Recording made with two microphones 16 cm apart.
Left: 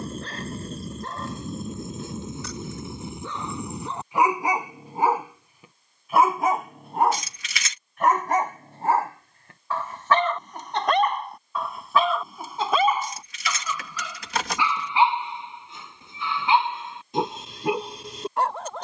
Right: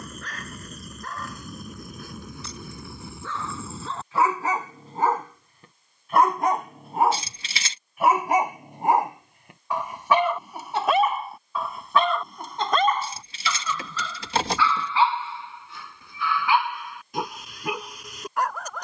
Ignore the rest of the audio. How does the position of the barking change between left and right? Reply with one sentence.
You can hear the barking move from left to right and back again.